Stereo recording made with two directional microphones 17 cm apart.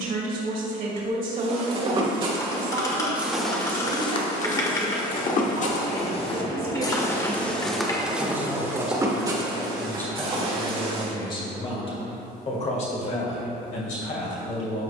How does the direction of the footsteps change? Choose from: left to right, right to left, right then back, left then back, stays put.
left then back.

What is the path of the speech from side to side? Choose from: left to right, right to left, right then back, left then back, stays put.
right to left.